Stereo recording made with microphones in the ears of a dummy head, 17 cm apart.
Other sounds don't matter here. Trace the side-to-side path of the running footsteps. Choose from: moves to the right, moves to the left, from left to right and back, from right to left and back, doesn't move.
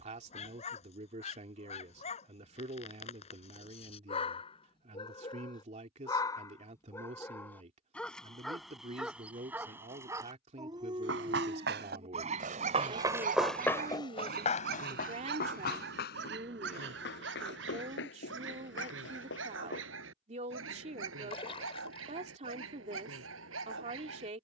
moves to the left.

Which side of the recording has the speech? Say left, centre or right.
right.